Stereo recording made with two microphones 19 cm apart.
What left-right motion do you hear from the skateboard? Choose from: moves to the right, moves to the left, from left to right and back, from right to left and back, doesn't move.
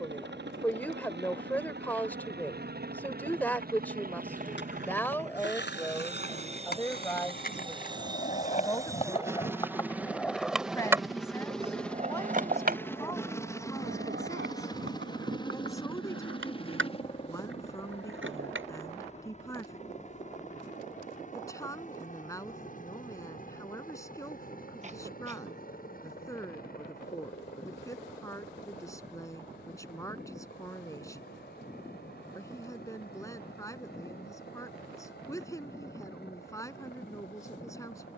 moves to the right.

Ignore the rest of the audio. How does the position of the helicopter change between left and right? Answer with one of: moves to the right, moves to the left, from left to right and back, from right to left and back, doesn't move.
moves to the left.